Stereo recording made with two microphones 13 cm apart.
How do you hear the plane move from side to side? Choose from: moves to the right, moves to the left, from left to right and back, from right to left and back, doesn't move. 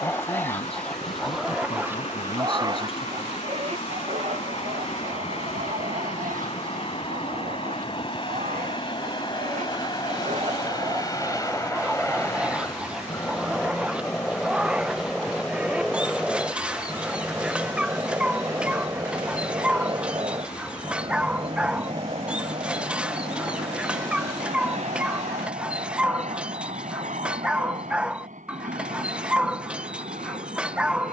moves to the right.